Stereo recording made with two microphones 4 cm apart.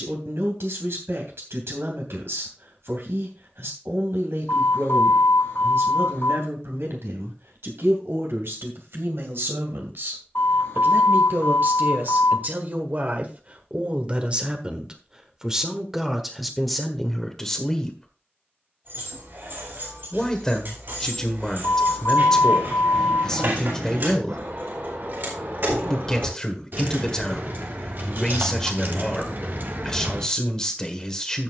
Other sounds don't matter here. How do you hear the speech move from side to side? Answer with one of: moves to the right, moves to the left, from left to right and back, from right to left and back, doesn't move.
moves to the left.